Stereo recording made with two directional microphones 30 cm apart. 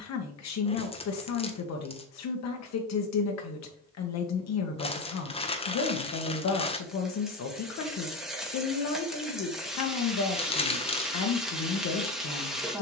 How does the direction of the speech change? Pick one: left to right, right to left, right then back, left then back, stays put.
stays put.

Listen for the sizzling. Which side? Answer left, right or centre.
centre.